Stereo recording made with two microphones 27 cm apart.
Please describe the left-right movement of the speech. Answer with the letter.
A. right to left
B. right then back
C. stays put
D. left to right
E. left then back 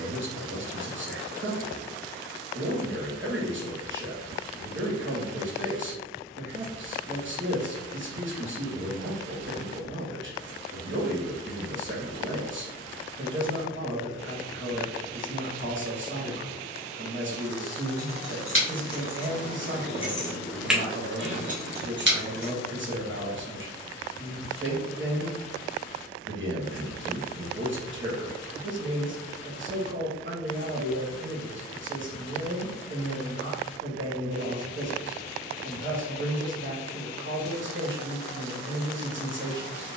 C.